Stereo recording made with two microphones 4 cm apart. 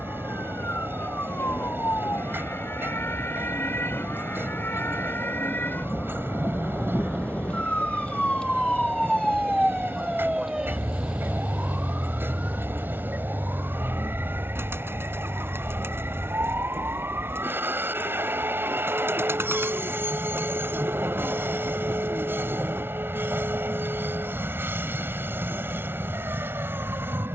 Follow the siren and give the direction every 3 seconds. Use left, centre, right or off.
left, left, left, centre, right, right, right, right, right.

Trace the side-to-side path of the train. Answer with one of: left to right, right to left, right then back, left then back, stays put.
stays put.